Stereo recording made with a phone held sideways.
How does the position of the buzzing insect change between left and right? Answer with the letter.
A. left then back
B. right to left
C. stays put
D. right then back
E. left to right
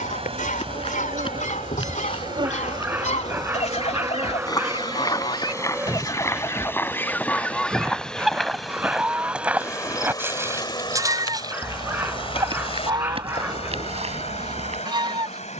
B.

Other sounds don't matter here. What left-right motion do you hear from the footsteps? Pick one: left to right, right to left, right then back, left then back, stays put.
left to right.